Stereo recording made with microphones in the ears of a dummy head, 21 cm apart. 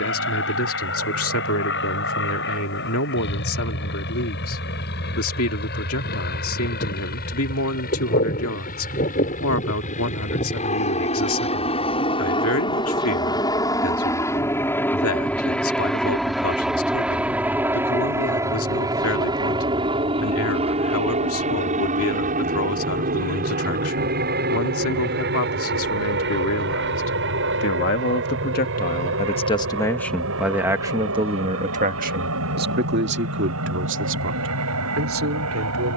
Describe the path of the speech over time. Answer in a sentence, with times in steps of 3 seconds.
In this clip you hear the speech on the left from 0 s and on the right from 30 s.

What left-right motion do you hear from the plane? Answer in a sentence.
You can hear the plane move from left to right.